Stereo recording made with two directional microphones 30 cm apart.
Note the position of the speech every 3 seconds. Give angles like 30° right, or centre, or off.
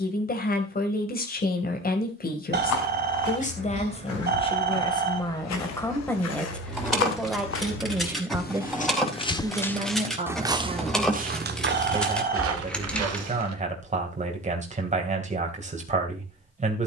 30° left, 20° left, centre, 20° right, 20° right, 20° right.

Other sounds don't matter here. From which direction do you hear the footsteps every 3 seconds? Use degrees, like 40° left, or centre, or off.
70° left, 60° left, 40° left, 10° right, 50° right, off.